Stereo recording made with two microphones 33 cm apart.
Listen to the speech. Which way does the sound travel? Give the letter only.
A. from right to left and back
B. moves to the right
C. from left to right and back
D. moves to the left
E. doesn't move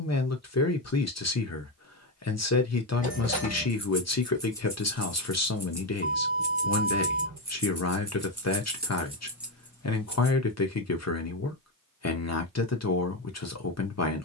E.